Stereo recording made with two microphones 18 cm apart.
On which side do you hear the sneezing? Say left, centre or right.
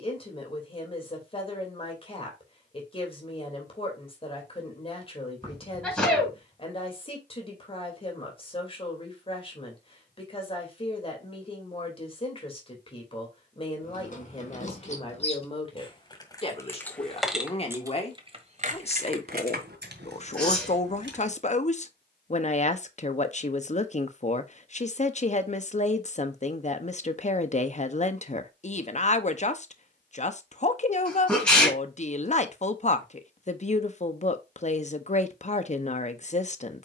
centre.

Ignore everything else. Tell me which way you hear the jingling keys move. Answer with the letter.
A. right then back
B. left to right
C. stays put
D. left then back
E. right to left
B.